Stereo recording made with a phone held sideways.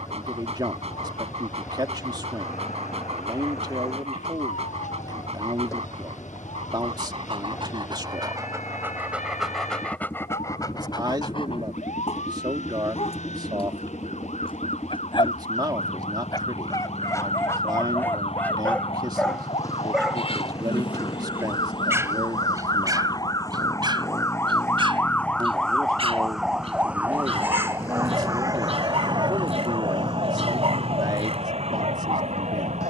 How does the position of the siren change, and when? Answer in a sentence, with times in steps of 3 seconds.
You can hear the siren on the left from 0 s, in the centre from 24 s and on the right from 27 s.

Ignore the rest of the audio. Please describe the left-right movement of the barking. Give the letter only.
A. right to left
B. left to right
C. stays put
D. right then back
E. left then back
E.